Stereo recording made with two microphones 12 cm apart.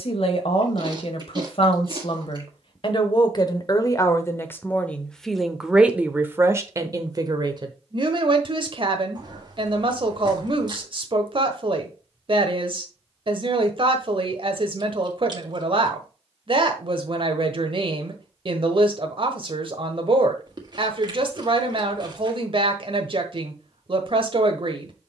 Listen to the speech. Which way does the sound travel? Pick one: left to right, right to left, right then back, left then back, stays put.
left to right.